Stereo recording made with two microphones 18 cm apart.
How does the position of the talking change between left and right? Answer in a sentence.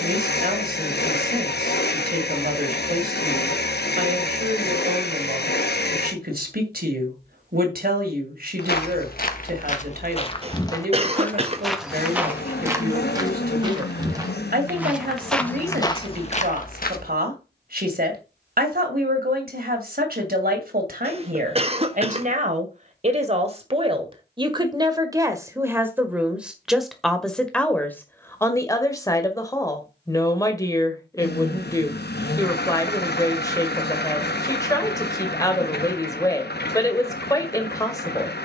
In this clip you hear the talking move from right to left.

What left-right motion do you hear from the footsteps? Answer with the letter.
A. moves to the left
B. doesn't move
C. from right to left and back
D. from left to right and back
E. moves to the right
D.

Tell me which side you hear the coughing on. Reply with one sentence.
You can hear the coughing on the right.